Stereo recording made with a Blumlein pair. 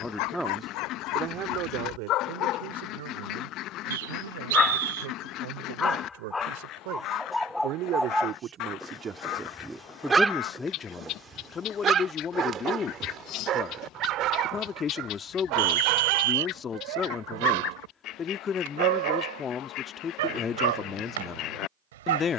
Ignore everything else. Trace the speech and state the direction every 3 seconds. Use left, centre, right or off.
right, right, right, centre, left, left, left, left.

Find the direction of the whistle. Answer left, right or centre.
right.